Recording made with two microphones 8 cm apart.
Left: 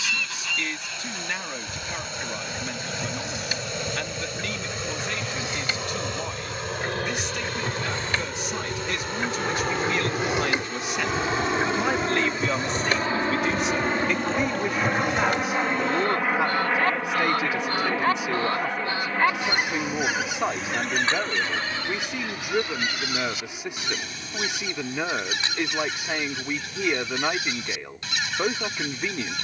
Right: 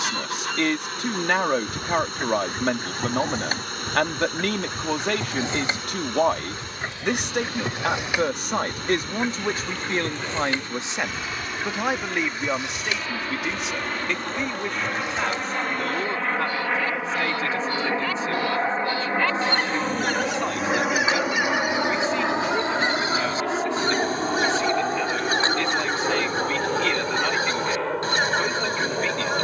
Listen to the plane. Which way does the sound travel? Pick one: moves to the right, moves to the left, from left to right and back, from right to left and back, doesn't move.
moves to the right.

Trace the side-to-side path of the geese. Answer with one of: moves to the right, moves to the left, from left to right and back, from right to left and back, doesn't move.
from right to left and back.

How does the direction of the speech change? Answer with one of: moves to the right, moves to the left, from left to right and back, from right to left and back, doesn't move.
moves to the left.